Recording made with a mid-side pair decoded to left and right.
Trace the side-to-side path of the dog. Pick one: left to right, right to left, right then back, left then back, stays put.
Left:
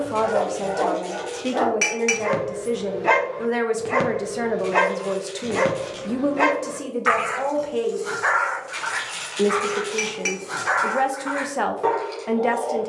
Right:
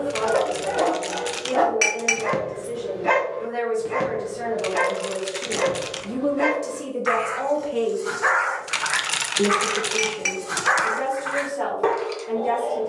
left then back.